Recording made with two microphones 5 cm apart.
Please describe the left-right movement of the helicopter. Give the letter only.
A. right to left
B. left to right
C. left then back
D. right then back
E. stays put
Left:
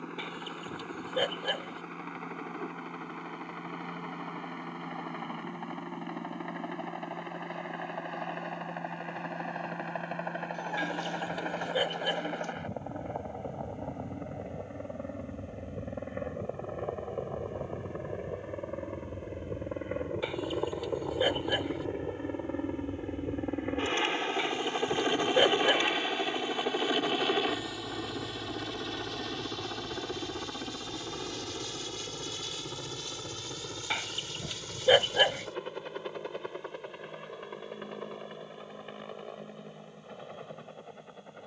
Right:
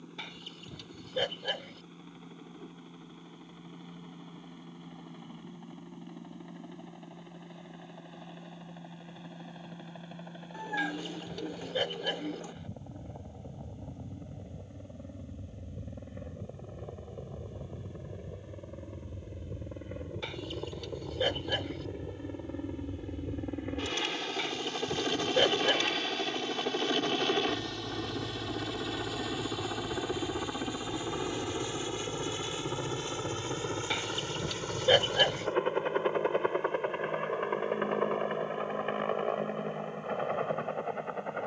B.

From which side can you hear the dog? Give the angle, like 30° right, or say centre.
10° left.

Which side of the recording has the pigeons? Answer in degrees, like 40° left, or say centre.
10° right.